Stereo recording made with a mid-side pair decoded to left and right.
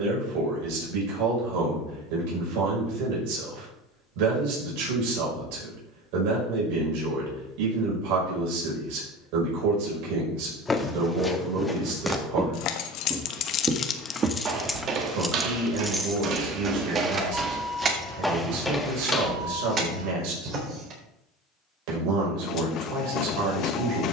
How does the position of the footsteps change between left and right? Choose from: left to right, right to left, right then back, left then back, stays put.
right then back.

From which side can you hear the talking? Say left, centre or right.
right.